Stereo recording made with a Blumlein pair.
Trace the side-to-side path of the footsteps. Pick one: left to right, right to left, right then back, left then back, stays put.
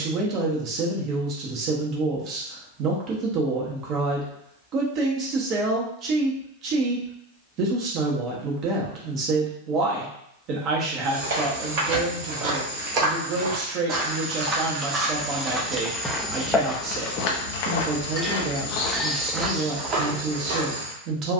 left then back.